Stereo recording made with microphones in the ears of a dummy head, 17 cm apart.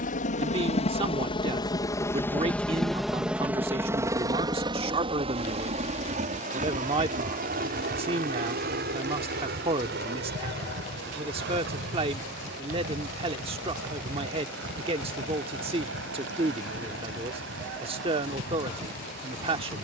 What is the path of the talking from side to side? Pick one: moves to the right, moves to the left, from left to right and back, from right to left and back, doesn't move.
doesn't move.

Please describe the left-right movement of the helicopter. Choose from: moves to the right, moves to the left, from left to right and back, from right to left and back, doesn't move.
moves to the right.